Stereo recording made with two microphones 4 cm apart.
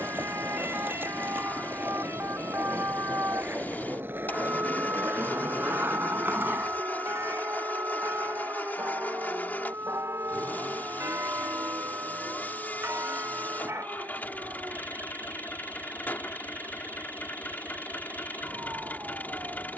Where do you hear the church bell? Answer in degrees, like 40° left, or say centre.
70° right.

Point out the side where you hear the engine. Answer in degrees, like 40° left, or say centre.
40° left.